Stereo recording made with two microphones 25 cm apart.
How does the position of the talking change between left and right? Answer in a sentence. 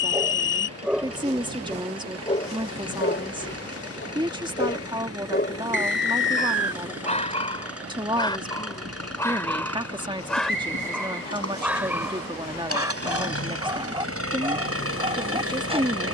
You can hear the talking stay put.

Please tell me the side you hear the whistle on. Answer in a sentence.
In this clip you hear the whistle on the left.